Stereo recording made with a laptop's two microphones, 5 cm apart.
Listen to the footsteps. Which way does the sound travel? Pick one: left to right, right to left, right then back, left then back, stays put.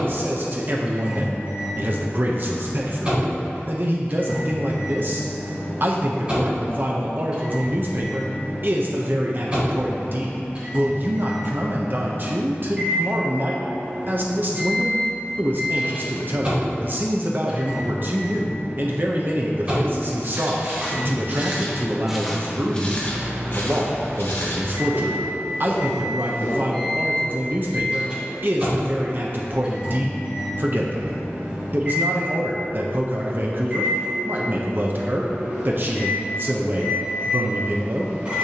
right to left.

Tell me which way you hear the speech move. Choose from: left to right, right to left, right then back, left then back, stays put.
stays put.